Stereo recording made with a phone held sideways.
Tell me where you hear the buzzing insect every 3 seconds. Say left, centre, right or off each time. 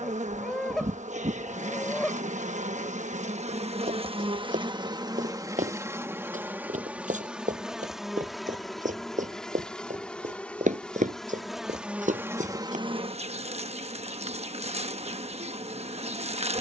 right, right, centre, centre, right, right.